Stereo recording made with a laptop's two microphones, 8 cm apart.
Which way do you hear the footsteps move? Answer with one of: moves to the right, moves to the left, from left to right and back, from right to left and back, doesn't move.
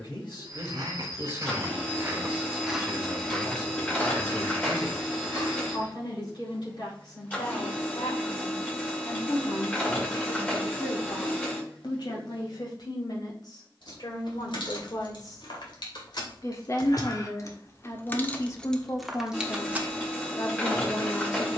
moves to the left.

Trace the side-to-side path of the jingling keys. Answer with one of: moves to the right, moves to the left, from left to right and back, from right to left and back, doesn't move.
moves to the right.